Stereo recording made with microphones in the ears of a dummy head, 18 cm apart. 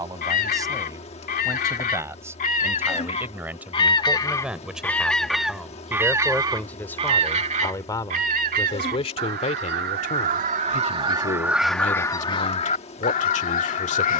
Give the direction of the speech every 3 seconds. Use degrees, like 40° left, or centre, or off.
20° right, centre, 20° left, 40° left, 40° left.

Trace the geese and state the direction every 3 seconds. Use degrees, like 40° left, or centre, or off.
50° left, 10° left, 40° right, 30° right, 40° left.